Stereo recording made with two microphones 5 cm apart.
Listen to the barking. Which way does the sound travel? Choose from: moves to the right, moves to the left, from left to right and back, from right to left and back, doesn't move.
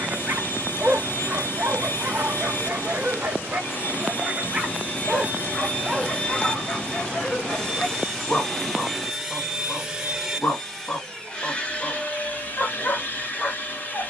moves to the left.